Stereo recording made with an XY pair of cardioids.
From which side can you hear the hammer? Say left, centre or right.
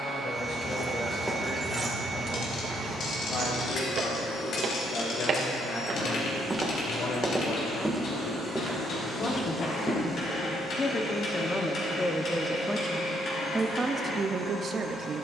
left.